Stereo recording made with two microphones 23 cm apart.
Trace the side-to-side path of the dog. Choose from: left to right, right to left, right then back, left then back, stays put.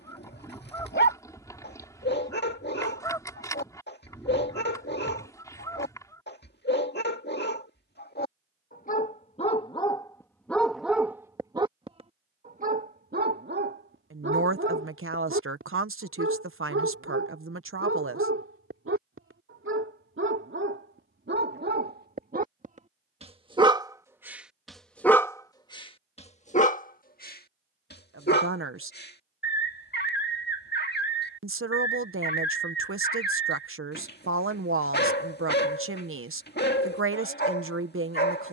right then back.